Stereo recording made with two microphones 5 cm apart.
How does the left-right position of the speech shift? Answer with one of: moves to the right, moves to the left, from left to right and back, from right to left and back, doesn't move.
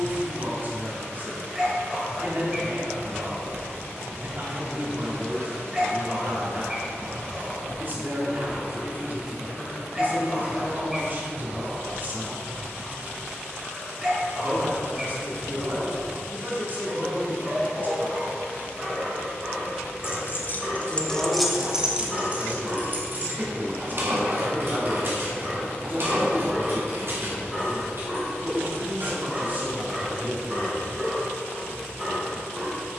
doesn't move.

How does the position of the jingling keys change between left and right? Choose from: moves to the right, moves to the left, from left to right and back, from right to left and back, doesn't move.
moves to the right.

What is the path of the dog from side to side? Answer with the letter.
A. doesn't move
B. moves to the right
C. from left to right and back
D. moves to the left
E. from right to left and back
A.